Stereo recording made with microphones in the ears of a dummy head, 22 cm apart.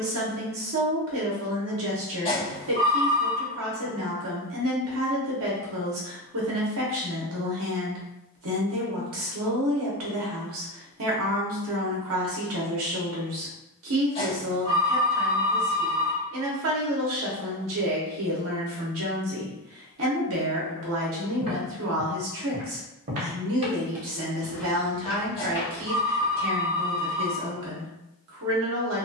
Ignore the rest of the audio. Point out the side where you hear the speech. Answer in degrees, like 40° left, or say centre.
60° right.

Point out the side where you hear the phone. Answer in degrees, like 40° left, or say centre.
20° left.